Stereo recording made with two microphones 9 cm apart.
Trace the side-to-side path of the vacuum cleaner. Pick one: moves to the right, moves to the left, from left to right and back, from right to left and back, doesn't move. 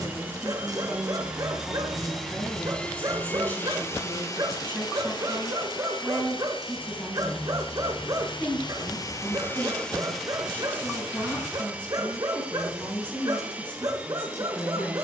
from right to left and back.